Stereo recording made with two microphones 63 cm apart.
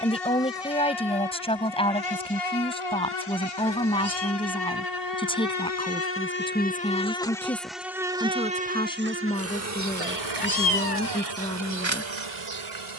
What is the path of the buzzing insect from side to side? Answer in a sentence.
You can hear the buzzing insect move from left to right.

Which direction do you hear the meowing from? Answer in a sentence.
You can hear the meowing on the left.